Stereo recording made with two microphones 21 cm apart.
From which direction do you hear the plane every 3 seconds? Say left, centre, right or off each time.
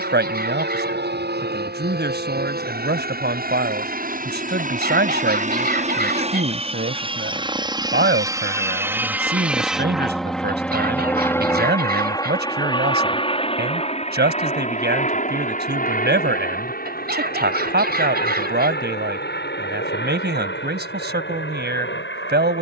right, right, right, centre, left, left, left, left.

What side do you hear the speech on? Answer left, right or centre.
right.